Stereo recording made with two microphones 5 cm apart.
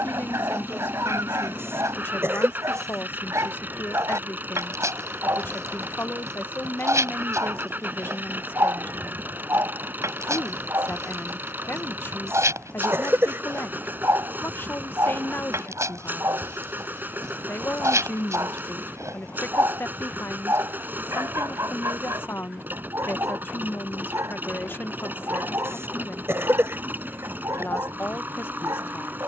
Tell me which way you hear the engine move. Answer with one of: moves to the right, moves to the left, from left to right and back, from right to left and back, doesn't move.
doesn't move.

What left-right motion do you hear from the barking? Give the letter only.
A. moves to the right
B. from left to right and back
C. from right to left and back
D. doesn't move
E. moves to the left
D.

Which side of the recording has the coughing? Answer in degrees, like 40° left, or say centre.
50° right.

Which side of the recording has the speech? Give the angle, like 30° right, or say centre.
40° left.